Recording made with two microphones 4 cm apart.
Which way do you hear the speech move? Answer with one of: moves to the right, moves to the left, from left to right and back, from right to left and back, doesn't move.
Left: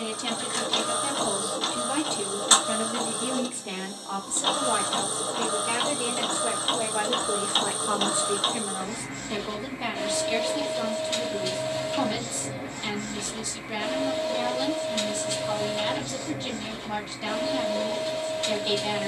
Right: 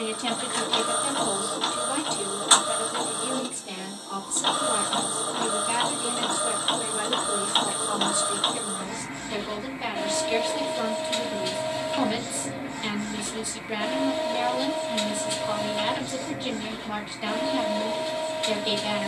from right to left and back.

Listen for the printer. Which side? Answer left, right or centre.
centre.